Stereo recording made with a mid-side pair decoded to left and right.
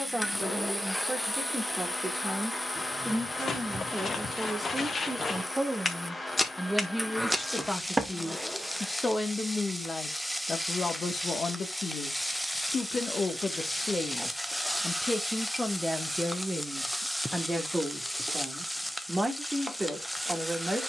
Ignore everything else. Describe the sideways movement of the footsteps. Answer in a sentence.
In this clip you hear the footsteps move from left to right.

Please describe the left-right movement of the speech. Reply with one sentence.
You can hear the speech move from right to left and back again.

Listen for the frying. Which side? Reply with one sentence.
You can hear the frying in the centre.